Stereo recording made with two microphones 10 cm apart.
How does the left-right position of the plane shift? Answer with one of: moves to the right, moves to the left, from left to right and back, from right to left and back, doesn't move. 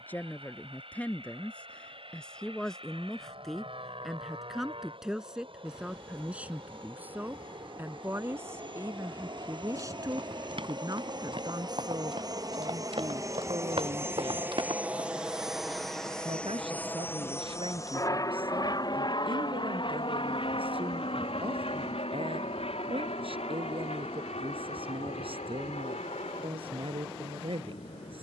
moves to the left.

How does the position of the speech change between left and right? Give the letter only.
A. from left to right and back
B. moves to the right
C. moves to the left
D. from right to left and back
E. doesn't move
B.